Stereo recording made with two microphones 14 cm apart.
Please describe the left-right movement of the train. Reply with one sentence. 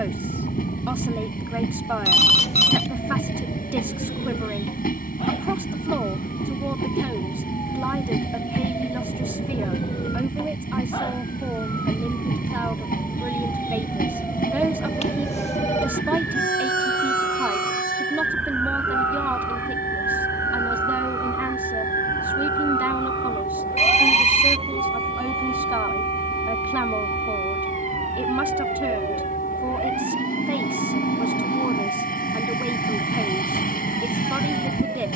In this clip you hear the train stay in one place.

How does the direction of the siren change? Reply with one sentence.
You can hear the siren move from left to right.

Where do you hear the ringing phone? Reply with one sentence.
In this clip you hear the ringing phone on the left.